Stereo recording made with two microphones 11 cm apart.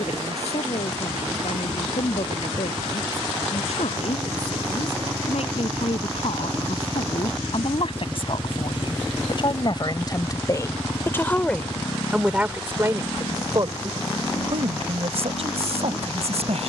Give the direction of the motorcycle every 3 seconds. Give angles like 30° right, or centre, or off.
50° right, 40° right, 10° right, 30° left, 60° left, 70° left.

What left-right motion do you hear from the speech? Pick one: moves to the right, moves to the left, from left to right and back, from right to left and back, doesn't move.
moves to the right.